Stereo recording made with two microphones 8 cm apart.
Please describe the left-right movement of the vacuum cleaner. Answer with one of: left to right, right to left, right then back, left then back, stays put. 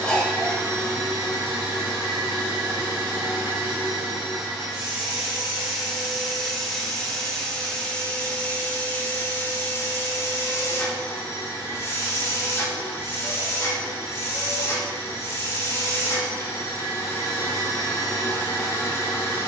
right to left.